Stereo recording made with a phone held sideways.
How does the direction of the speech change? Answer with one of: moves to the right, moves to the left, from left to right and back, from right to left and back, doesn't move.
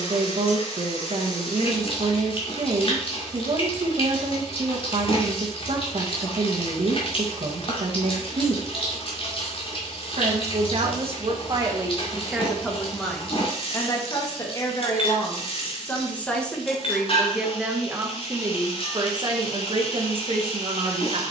from right to left and back.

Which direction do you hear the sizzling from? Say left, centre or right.
left.